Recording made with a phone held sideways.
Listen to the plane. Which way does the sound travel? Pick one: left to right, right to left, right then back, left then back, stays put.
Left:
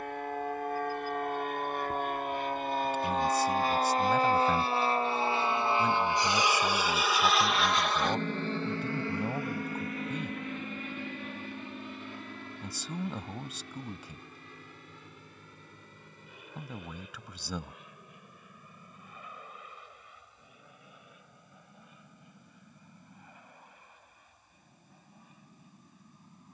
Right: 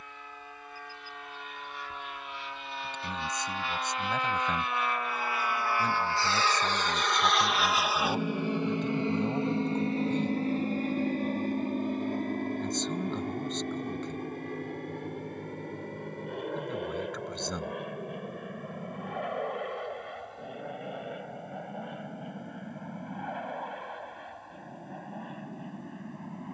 left to right.